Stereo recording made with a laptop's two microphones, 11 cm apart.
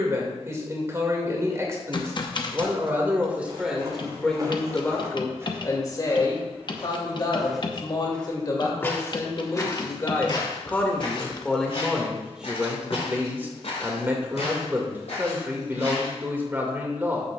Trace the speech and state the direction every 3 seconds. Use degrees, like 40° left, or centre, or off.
30° right, 10° left, 40° left, 20° left, 10° right, 20° right.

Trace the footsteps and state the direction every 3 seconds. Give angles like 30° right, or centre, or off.
off, 30° right, centre, 50° left, 70° left, 80° left.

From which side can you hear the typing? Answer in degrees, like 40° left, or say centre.
40° left.